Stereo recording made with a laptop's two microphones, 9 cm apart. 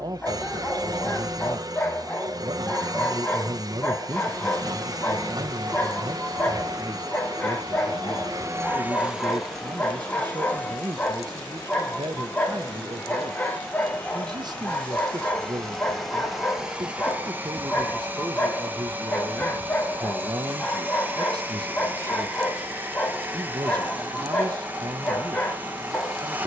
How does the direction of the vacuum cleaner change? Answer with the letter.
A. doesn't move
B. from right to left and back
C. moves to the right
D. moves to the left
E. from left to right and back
B.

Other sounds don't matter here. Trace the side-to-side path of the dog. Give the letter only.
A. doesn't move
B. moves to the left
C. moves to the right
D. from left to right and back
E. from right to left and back
A.